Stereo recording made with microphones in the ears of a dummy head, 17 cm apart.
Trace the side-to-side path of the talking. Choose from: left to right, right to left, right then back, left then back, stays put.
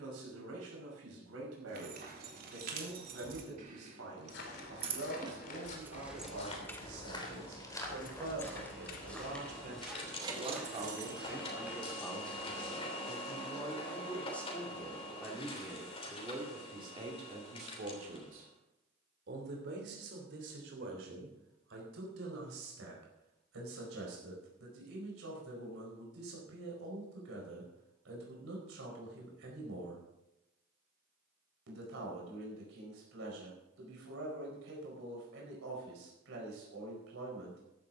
left then back.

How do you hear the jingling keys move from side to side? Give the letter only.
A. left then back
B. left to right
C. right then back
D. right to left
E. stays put
A.